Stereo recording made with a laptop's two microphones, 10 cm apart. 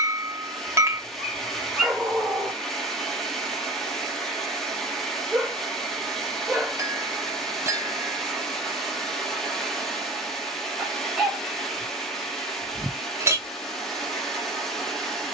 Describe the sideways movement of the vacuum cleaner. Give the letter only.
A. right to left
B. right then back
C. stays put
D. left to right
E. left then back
C.